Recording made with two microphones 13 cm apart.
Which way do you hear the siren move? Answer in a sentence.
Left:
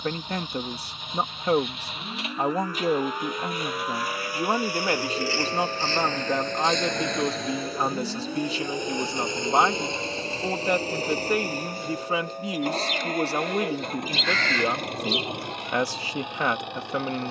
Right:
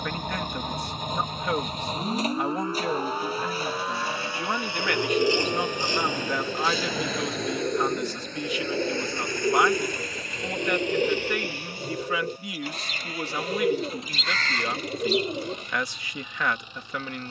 In this clip you hear the siren travel towards the left.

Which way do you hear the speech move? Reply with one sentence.
In this clip you hear the speech stay in one place.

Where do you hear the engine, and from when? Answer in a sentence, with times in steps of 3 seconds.
In this clip you hear the engine on the right from 0 s, in the centre from 6 s and on the left from 9 s.